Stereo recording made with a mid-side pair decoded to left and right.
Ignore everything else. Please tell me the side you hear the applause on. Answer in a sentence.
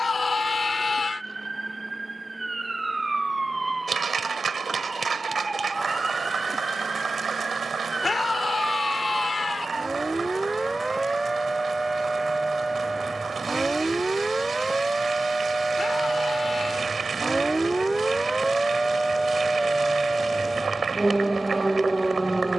You can hear the applause on the right.